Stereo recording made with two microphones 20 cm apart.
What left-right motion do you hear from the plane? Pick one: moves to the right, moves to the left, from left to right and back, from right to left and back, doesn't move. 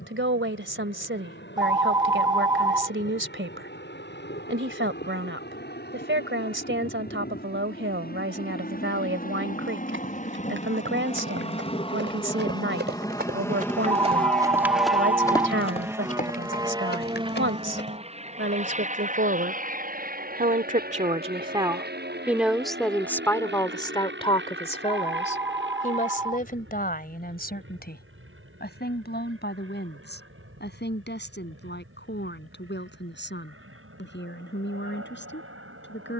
moves to the right.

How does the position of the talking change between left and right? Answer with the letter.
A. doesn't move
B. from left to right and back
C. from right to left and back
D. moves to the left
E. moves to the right
D.